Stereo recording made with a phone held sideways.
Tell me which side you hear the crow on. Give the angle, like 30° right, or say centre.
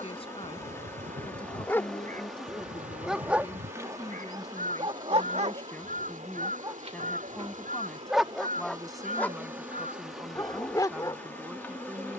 70° right.